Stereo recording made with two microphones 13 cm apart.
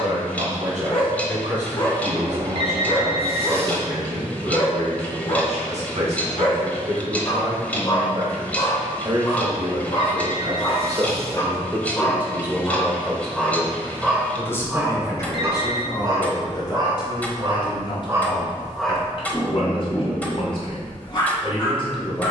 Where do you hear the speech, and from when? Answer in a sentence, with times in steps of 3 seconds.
In this clip you hear the speech on the right from 0 s, in the centre from 12 s and on the left from 15 s.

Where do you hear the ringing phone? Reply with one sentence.
You can hear the ringing phone on the right.